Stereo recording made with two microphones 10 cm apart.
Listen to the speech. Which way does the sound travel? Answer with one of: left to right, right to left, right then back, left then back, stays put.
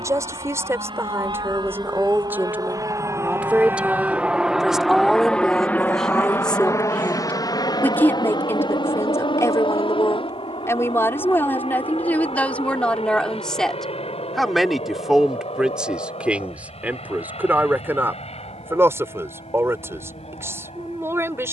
left then back.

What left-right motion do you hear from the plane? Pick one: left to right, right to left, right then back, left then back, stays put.
right to left.